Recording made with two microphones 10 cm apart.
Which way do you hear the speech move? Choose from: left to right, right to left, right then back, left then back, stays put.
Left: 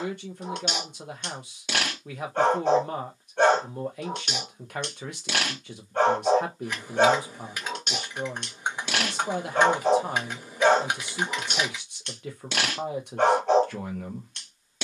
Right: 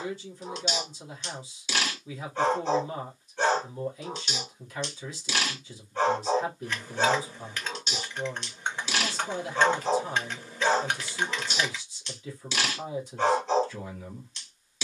stays put.